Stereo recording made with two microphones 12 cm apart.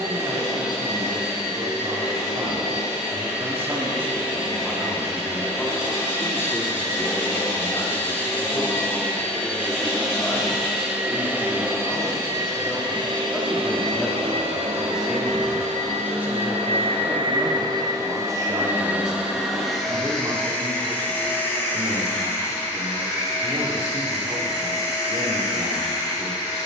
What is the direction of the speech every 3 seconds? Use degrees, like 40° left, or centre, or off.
40° right, 10° right, 30° left, 20° left, 10° left, 10° right, 30° right, 40° right, 40° right.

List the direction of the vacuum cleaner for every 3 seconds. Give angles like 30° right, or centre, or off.
30° left, 30° left, 20° left, centre, 50° right, 60° right, centre, 20° left, 30° left.